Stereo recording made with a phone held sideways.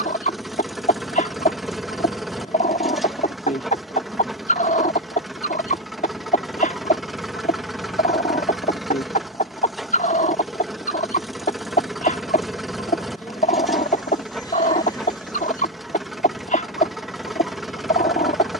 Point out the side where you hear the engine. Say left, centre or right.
centre.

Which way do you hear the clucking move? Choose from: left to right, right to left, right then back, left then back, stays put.
stays put.